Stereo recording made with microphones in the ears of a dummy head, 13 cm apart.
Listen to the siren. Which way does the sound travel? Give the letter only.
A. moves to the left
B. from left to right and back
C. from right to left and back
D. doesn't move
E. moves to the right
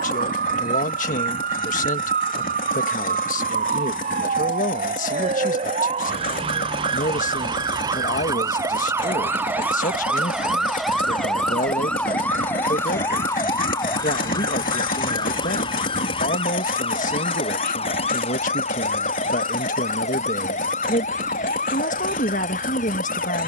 A.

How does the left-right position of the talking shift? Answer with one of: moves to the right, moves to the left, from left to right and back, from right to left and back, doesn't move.
doesn't move.